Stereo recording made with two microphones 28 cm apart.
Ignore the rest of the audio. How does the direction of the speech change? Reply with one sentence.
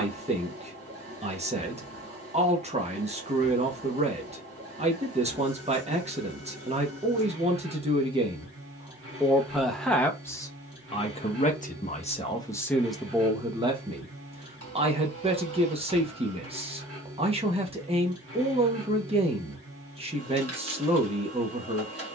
In this clip you hear the speech move from right to left and back again.